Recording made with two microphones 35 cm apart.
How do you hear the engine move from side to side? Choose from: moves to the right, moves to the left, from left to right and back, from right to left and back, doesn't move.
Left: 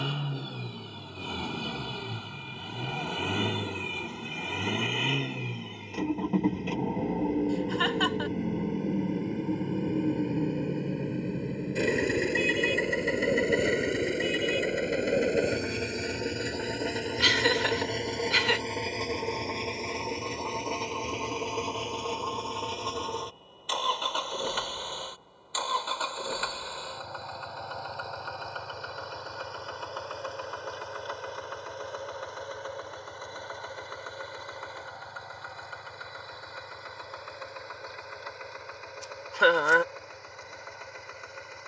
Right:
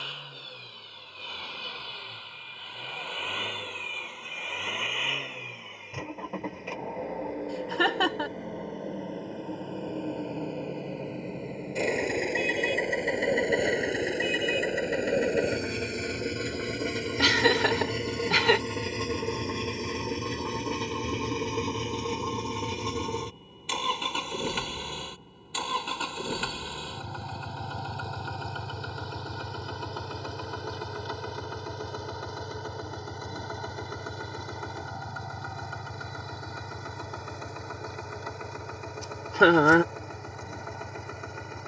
moves to the right.